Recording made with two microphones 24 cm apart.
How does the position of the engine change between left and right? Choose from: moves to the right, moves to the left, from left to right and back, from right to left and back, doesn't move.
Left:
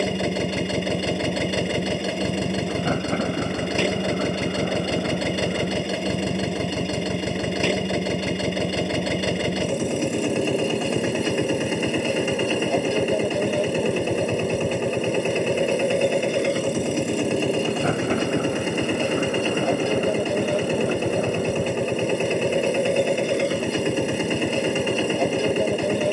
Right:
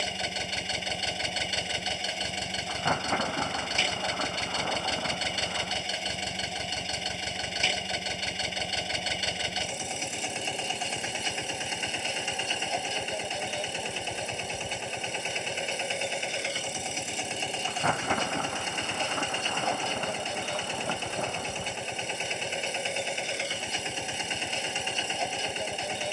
doesn't move.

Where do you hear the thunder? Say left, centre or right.
left.